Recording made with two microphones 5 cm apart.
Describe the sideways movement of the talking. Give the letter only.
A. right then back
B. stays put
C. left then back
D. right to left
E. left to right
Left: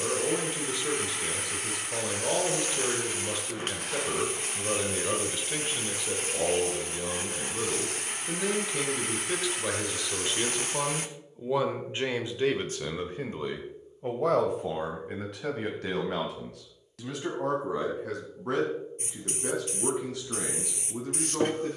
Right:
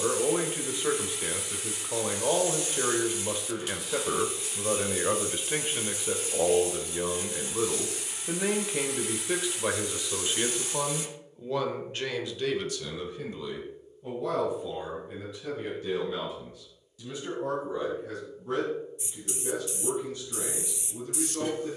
D.